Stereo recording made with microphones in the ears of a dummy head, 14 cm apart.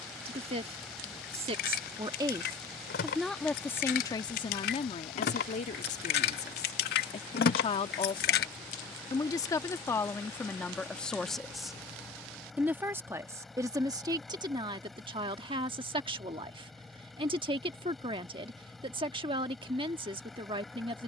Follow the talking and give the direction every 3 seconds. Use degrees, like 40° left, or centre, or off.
30° right, 30° left, 40° left, 10° left, 20° right, 30° right, 30° right.